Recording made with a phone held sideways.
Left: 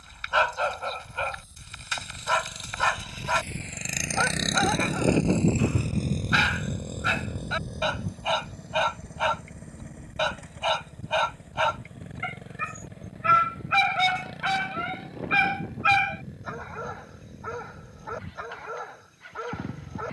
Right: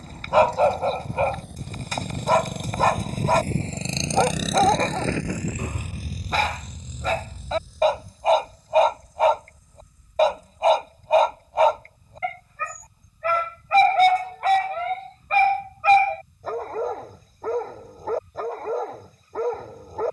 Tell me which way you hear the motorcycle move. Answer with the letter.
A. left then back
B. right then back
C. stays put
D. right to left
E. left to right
D.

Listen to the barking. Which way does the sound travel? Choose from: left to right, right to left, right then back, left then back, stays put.
stays put.